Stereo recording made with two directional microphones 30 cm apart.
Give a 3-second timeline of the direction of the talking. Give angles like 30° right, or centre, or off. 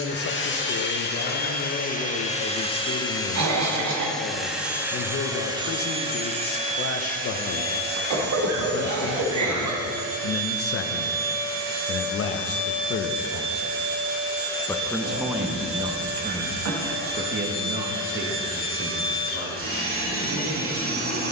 50° left, 50° left, 50° left, 50° left, 30° left, 20° right, 40° right.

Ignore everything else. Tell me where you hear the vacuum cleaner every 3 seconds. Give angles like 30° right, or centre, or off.
30° left, centre, 30° right, 40° right, 40° right, 40° right, 40° right.